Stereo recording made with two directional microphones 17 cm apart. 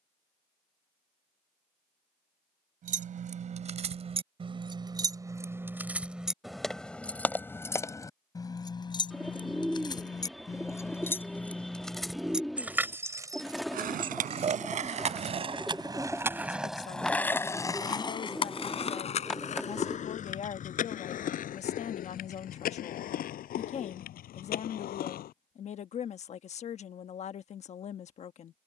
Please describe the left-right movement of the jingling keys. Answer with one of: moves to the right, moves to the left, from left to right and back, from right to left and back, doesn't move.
from right to left and back.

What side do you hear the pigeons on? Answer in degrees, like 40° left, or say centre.
centre.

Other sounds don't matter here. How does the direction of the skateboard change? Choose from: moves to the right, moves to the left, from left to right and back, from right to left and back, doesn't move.
moves to the left.